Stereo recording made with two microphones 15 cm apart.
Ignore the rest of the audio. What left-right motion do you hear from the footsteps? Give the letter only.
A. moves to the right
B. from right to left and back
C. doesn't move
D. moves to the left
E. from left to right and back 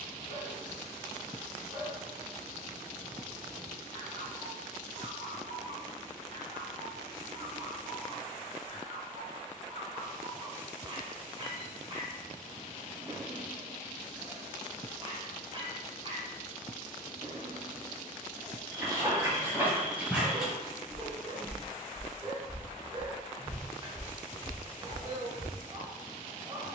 B.